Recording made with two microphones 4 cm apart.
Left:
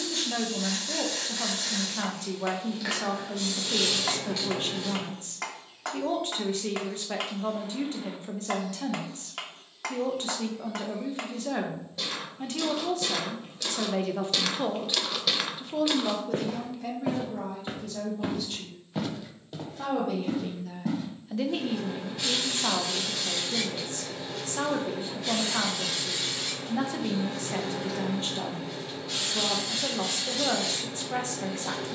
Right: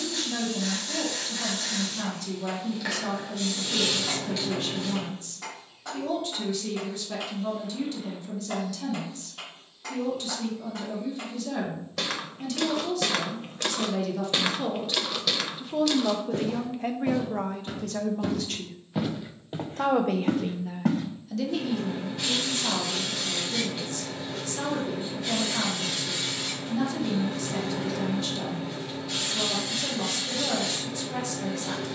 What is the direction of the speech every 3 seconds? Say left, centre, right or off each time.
left, left, left, left, left, right, right, left, left, left, left.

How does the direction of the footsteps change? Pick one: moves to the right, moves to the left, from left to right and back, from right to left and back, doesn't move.
from right to left and back.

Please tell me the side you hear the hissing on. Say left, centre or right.
centre.